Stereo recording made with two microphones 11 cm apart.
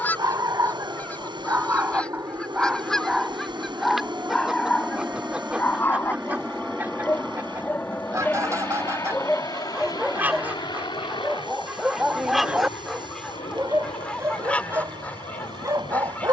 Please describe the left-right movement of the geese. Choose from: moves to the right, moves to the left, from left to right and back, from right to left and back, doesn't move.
from left to right and back.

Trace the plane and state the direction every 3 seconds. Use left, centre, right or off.
right, right, centre, left, left, left.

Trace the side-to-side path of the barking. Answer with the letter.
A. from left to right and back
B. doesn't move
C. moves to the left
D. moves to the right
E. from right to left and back
E.